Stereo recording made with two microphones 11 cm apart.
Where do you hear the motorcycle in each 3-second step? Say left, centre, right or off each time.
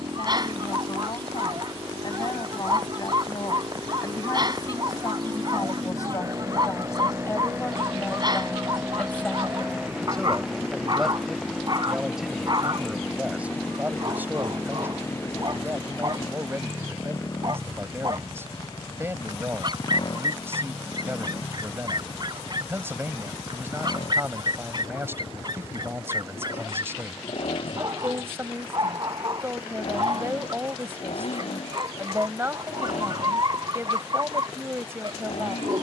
right, right, right, centre, centre, left, left, left, left, left, left, left.